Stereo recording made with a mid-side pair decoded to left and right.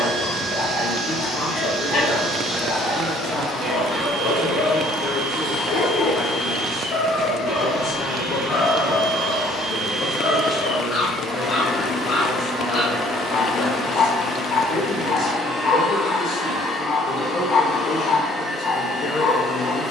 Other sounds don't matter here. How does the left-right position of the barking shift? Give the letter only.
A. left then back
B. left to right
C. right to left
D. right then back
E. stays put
E.